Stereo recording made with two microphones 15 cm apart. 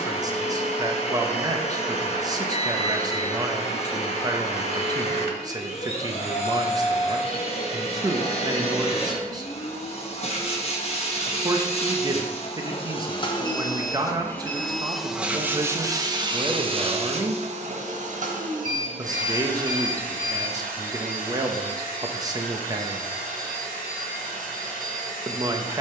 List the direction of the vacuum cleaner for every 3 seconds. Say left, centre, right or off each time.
left, left, left, left, left, right, right, right, right.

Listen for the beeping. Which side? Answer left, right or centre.
right.